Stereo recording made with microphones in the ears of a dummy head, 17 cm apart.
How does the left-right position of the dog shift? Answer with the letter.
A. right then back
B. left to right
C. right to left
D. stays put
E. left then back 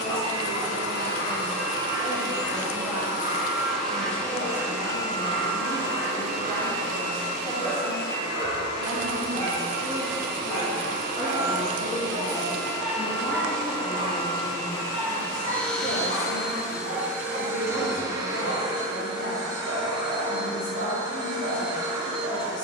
B.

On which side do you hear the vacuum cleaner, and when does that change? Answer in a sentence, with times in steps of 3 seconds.
In this clip you hear the vacuum cleaner on the right from 0 s, in the centre from 3 s, on the left from 6 s, in the centre from 15 s and on the right from 18 s.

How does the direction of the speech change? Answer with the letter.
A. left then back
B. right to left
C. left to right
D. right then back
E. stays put
B.